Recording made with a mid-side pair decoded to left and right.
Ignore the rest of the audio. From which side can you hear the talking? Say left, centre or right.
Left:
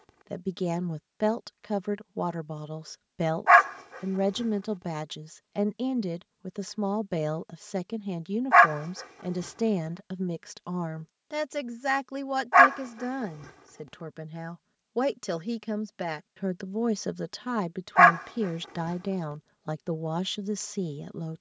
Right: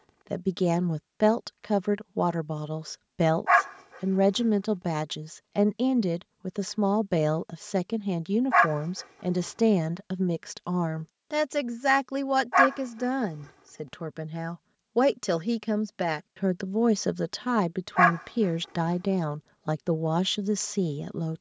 right.